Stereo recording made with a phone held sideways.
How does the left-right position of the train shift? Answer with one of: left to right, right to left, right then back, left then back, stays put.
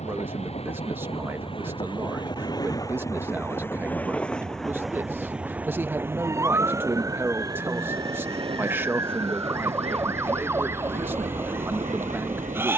left to right.